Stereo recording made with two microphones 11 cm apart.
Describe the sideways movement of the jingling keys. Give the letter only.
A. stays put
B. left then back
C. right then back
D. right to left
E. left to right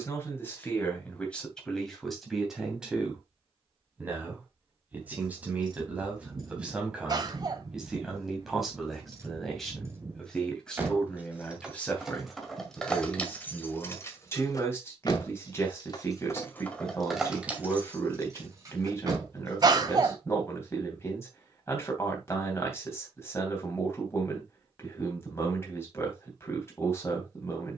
B.